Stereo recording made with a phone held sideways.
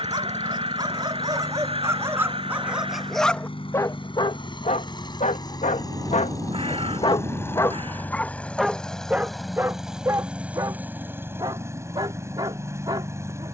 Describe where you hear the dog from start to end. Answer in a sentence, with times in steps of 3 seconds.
In this clip you hear the dog on the right from 0 s, on the left from 3 s and on the right from 9 s.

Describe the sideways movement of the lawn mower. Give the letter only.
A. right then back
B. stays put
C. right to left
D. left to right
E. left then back
D.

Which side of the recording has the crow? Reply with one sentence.
You can hear the crow on the right.